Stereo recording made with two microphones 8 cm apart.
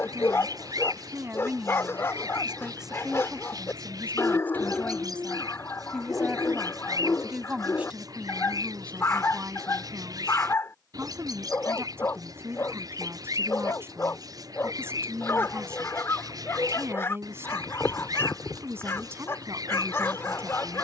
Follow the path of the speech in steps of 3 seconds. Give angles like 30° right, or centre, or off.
20° right, 10° left, 10° right, 30° right, 30° right, 30° right, 30° right.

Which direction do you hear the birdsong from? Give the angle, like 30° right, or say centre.
60° right.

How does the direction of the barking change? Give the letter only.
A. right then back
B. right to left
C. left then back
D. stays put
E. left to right
D.